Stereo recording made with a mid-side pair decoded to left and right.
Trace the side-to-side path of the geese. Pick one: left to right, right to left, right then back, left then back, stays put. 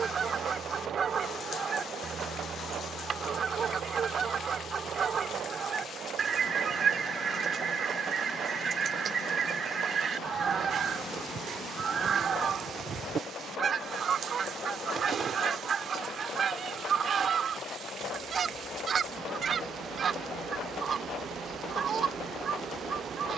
stays put.